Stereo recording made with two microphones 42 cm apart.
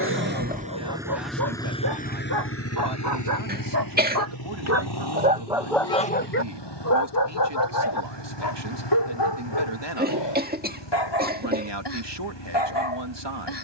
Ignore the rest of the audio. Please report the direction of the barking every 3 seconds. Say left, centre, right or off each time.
right, right, left, left, left.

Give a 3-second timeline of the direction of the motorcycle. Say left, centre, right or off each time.
centre, left, left, left, left.